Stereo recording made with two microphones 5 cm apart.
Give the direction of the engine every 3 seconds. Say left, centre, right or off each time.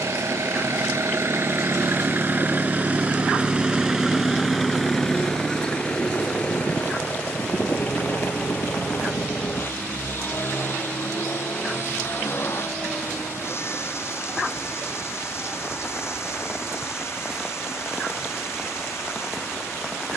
right, centre, left, left, left, left, left.